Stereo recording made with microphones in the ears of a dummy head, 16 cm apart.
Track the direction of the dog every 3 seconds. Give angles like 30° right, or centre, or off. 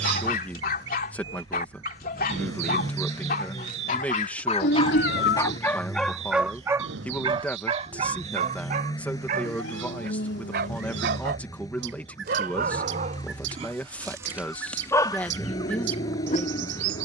50° left, 40° left, 30° right, 60° right, 30° right, 40° left.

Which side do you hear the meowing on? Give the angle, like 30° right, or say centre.
70° left.